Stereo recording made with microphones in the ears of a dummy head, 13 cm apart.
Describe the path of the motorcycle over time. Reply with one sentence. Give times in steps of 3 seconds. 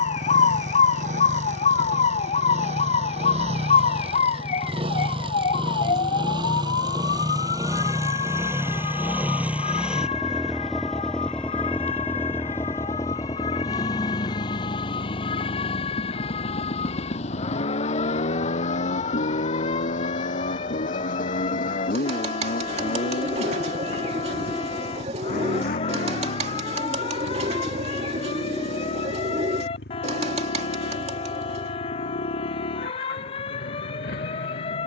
You can hear the motorcycle on the right from 0 s, in the centre from 9 s and on the left from 12 s.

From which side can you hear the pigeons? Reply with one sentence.
In this clip you hear the pigeons on the right.